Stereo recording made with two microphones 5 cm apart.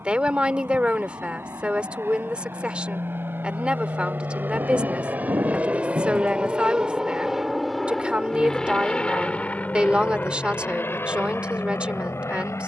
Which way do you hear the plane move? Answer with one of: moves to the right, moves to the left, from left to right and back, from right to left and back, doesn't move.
moves to the left.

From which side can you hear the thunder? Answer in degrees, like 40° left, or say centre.
70° right.